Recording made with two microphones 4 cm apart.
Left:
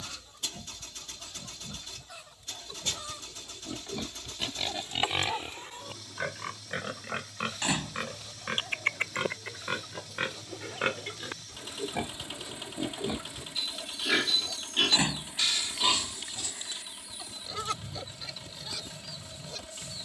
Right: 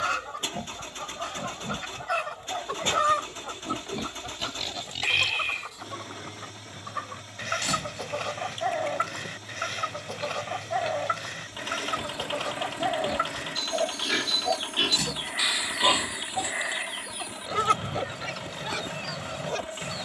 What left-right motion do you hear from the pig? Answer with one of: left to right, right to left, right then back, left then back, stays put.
left then back.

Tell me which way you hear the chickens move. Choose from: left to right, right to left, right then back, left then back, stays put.
stays put.